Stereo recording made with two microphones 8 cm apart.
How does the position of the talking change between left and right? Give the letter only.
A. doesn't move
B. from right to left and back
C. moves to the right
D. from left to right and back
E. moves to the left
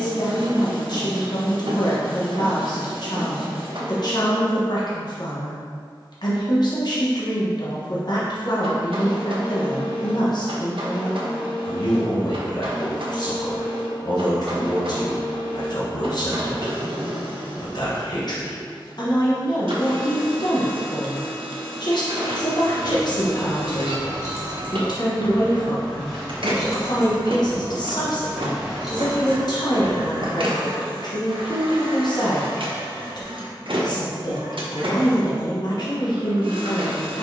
A.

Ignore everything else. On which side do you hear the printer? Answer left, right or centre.
right.